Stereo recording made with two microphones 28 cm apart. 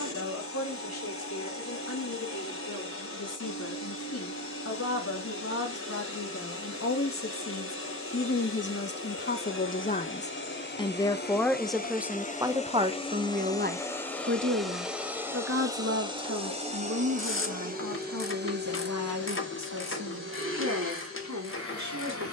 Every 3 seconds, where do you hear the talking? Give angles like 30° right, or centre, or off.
70° left, 60° left, 50° left, 20° left, 30° right, 60° right, 70° right, 80° right.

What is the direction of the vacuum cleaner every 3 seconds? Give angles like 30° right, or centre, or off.
50° left, 50° left, 50° left, 40° left, 10° left, 20° right, 40° right, 50° right.